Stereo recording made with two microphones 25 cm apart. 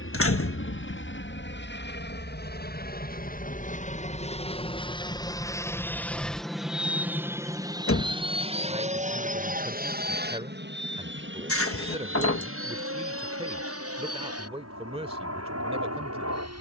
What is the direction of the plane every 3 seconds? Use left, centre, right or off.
left, left, centre, right, right, right.